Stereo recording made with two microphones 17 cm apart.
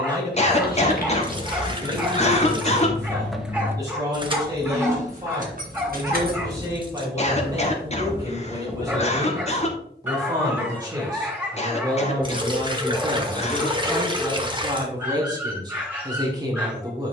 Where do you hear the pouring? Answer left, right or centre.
right.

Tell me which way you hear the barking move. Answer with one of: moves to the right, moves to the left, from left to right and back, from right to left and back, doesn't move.
doesn't move.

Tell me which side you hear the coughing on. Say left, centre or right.
left.